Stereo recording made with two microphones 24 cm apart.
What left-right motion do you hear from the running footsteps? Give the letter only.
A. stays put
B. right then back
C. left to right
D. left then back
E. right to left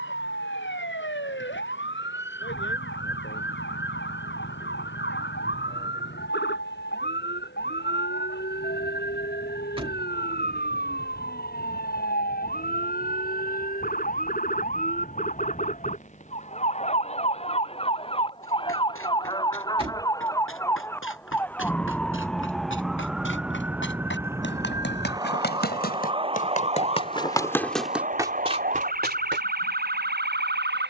C.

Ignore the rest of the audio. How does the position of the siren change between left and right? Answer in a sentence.
In this clip you hear the siren move from left to right.